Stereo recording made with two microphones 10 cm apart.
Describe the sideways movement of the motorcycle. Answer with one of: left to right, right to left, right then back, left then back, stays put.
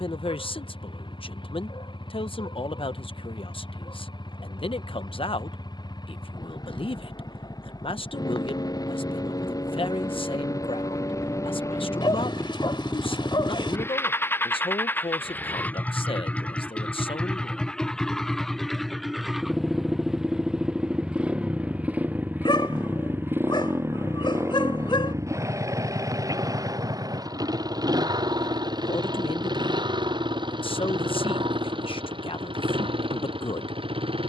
left to right.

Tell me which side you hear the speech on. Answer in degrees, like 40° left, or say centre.
60° left.